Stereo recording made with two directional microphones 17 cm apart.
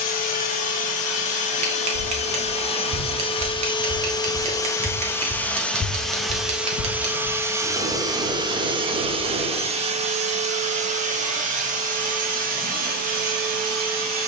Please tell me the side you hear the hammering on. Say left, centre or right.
right.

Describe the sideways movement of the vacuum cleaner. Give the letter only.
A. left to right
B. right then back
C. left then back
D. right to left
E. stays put
A.